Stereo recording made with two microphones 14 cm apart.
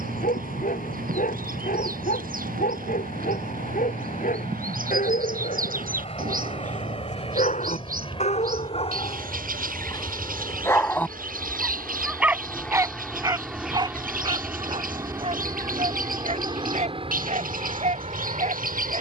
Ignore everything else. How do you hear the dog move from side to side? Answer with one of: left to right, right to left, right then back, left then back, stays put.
left to right.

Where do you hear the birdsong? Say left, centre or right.
right.